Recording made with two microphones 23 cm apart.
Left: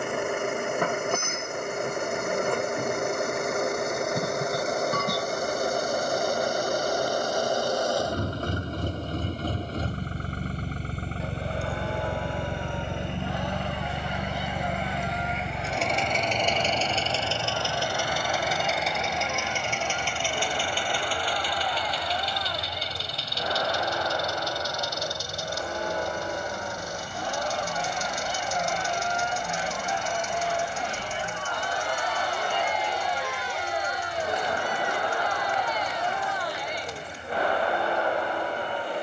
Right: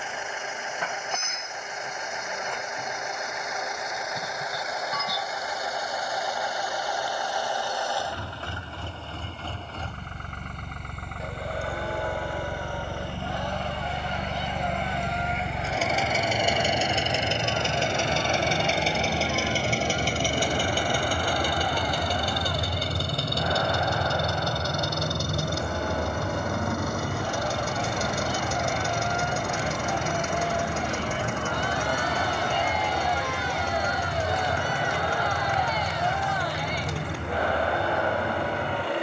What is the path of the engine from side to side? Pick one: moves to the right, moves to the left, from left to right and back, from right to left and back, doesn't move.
moves to the right.